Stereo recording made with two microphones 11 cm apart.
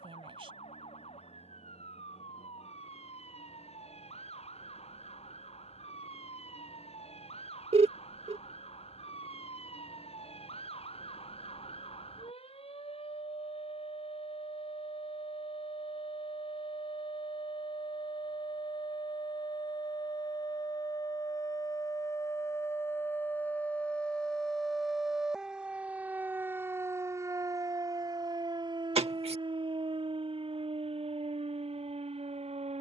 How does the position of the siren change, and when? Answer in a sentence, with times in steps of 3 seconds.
You can hear the siren on the left from 0 s, in the centre from 24 s and on the right from 27 s.